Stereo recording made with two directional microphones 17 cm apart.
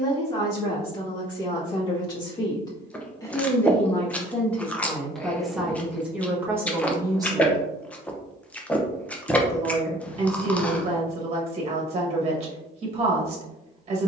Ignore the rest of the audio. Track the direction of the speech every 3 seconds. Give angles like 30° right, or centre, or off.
30° left, 10° left, 20° right, 40° right, 40° right.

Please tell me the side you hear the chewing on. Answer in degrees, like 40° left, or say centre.
10° left.